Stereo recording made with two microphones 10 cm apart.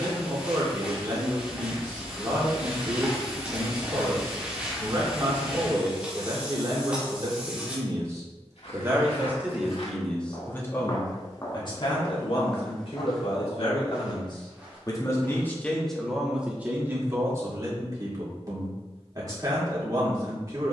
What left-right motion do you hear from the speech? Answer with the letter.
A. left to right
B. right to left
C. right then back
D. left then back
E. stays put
D.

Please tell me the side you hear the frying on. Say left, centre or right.
centre.